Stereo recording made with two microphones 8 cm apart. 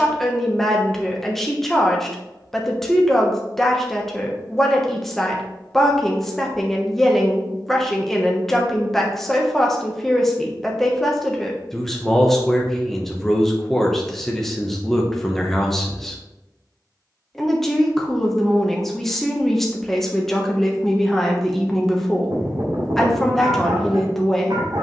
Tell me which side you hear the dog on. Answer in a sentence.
You can hear the dog on the right.